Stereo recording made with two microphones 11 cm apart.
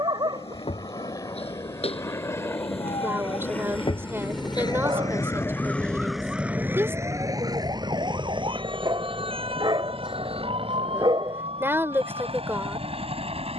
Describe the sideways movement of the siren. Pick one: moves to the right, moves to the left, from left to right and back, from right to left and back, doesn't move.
moves to the right.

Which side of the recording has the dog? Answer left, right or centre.
right.